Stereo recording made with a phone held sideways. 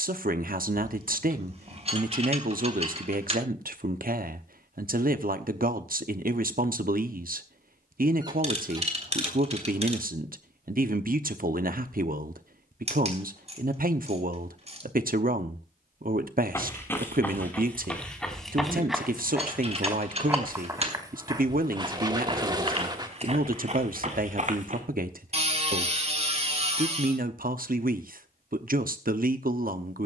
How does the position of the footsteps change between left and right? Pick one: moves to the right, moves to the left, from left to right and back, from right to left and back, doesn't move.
moves to the right.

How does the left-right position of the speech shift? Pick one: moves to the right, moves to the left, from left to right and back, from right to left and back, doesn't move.
doesn't move.